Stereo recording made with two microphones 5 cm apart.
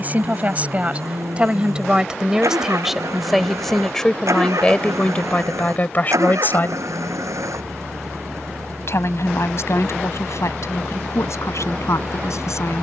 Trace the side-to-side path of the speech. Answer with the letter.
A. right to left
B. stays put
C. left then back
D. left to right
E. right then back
A.